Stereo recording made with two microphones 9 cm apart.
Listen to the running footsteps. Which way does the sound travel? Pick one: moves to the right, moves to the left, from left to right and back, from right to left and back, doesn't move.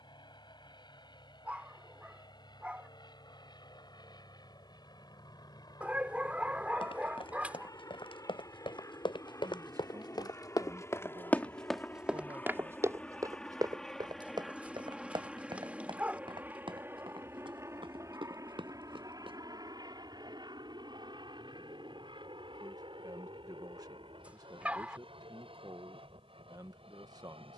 moves to the right.